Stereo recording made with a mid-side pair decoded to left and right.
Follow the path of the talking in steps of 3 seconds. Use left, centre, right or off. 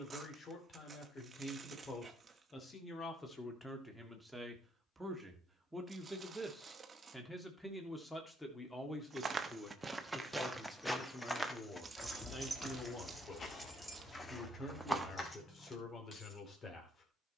left, centre, centre, left, left, left.